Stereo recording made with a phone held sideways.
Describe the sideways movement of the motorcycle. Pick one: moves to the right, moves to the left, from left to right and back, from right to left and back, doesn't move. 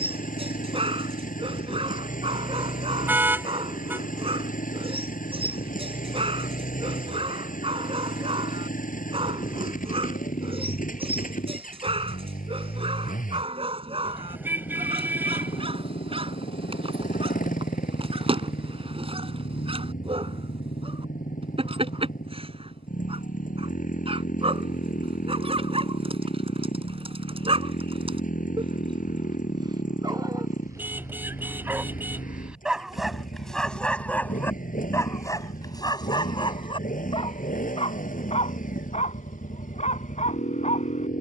doesn't move.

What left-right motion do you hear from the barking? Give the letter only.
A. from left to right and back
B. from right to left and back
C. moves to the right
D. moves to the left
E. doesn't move
D.